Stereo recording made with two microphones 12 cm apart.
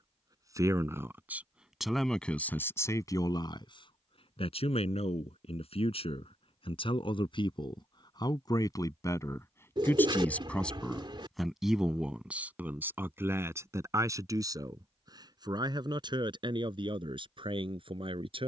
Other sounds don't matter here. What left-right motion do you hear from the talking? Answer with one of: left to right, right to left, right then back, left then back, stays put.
left then back.